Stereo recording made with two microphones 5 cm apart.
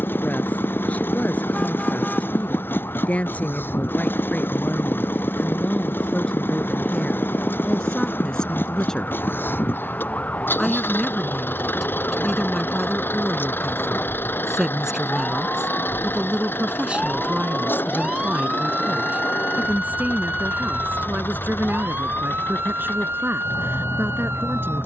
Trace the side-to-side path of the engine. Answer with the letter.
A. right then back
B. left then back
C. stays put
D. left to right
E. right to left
C.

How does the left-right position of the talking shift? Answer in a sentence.
You can hear the talking go from the left side to the right.